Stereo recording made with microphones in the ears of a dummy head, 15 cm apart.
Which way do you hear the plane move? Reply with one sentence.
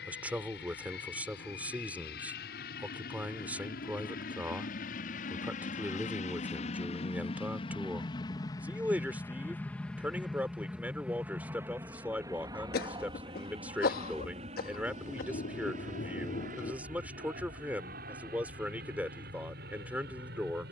In this clip you hear the plane go from the left side to the right.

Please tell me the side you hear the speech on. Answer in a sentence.
You can hear the speech in the centre.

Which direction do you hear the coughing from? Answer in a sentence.
In this clip you hear the coughing on the left.